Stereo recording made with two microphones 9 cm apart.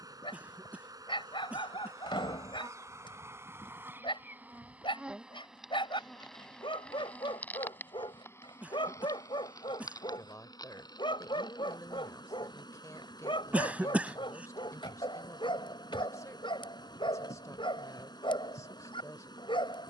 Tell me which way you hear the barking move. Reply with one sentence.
In this clip you hear the barking stay put.